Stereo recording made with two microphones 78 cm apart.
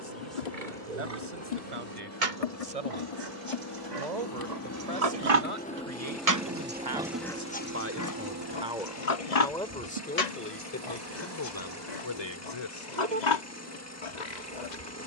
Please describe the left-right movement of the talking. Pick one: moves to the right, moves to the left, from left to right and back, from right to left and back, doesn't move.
moves to the left.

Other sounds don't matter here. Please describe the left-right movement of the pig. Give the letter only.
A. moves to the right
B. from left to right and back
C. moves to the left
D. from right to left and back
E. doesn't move
C.